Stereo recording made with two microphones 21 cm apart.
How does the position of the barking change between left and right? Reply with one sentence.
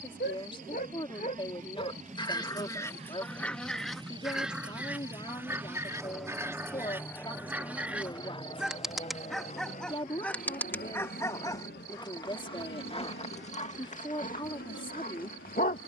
You can hear the barking go right and come back.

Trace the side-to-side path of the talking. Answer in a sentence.
In this clip you hear the talking stay put.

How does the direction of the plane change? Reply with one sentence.
In this clip you hear the plane move from right to left.